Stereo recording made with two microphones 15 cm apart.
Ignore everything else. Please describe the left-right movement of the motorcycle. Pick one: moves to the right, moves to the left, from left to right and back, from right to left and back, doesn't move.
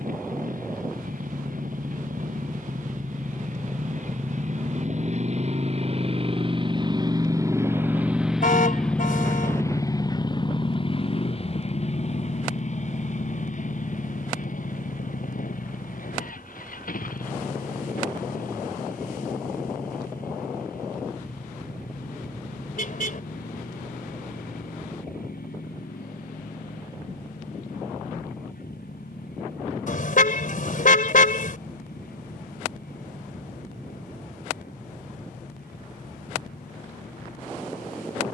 moves to the left.